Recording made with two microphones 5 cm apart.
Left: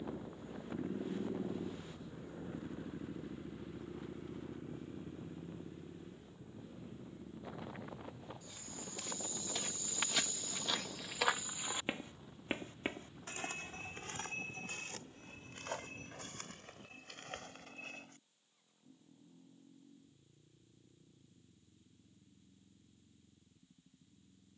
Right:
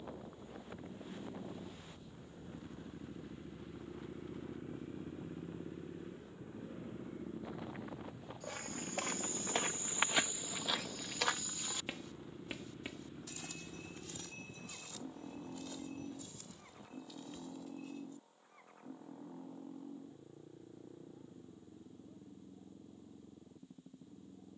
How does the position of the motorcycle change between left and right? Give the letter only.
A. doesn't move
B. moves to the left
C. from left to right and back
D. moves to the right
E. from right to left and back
D.